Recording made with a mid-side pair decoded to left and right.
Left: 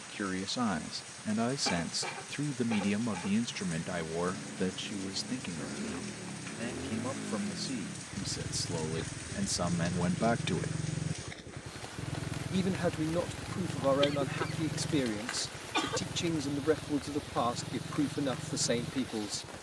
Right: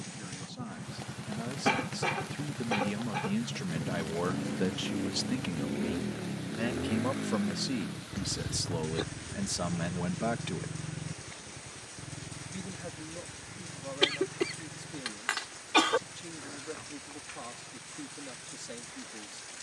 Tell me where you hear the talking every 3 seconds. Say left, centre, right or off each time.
left, centre, right, centre, left, left, left.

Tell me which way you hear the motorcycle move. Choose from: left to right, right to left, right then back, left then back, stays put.
right to left.